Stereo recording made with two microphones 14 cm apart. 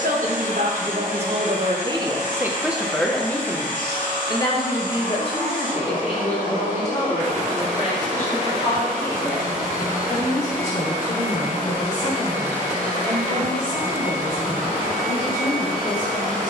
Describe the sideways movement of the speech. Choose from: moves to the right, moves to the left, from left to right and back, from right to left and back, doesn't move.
moves to the left.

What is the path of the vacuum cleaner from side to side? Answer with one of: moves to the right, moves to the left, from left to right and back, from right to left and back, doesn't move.
doesn't move.